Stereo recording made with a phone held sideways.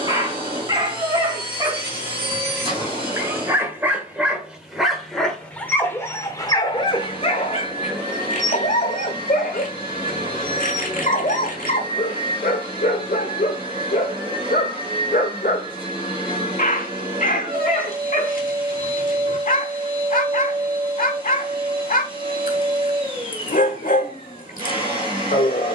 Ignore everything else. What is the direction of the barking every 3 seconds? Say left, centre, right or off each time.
right, centre, left, left, left, left, left, left, left.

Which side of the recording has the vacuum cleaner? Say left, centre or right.
right.